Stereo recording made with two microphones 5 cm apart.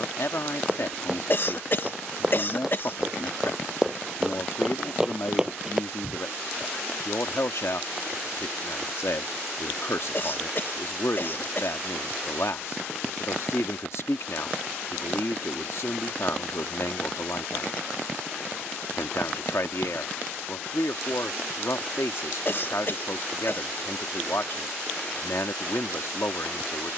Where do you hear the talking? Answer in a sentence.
In this clip you hear the talking on the left.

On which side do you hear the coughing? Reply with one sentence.
You can hear the coughing on the left.